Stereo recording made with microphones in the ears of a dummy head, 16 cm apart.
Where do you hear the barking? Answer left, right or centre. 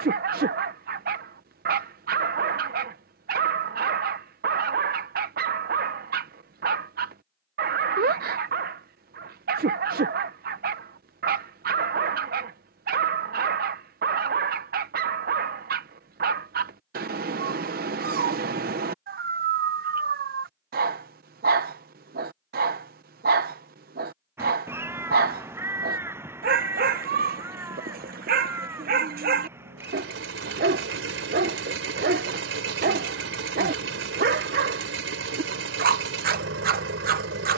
right.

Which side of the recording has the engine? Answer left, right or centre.
right.